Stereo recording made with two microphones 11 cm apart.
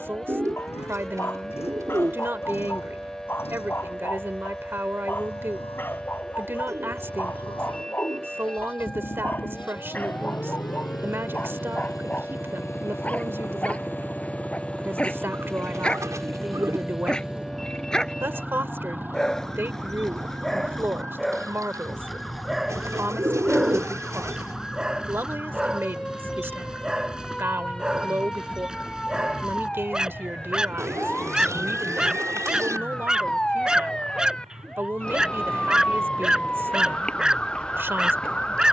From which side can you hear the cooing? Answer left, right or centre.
right.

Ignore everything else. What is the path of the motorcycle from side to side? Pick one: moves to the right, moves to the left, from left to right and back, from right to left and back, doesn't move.
moves to the right.